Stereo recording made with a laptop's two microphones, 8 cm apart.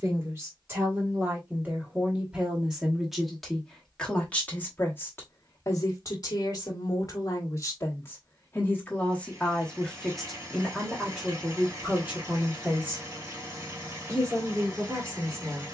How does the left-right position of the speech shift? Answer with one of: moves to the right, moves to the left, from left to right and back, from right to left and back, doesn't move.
from right to left and back.